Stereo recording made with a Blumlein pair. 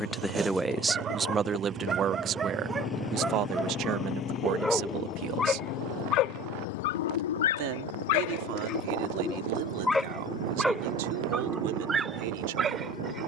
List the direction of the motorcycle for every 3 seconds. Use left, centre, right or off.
right, left, left, left, left.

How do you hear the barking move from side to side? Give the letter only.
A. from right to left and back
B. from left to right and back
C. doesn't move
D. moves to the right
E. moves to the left
A.